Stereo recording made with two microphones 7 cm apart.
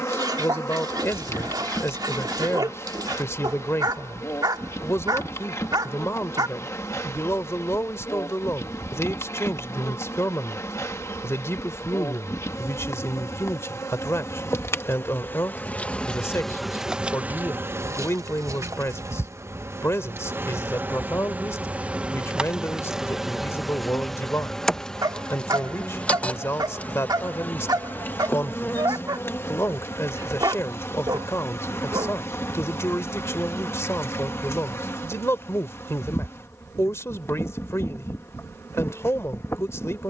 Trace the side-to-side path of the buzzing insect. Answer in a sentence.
In this clip you hear the buzzing insect move from left to right and back again.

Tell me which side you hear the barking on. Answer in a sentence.
In this clip you hear the barking on the right.